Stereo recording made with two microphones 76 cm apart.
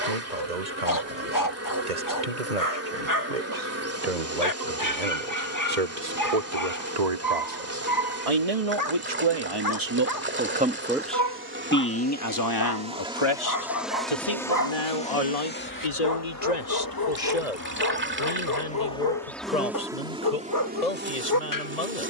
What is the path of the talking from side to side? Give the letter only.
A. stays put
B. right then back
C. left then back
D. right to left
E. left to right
D.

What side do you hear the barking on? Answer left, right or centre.
left.